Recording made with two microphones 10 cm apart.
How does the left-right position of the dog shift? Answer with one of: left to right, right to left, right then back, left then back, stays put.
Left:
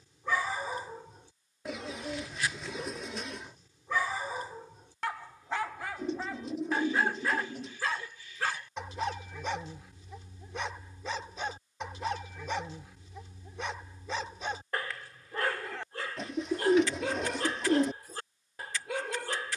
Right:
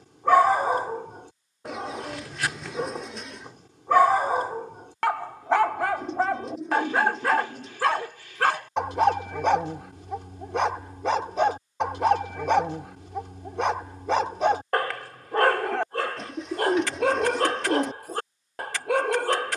stays put.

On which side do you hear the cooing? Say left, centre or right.
centre.